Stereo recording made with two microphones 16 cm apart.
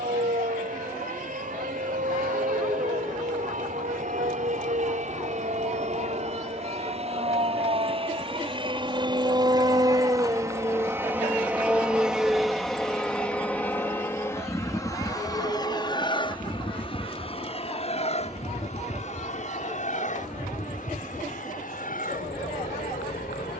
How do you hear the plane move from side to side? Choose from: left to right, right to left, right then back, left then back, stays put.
right to left.